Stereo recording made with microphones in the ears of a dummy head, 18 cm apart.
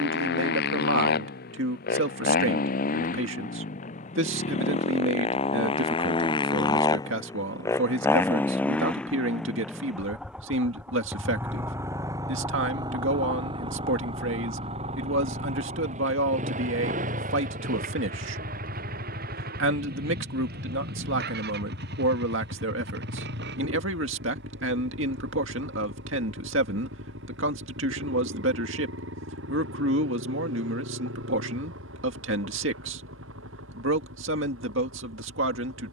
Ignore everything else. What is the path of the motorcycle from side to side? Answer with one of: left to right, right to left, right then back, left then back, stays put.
left to right.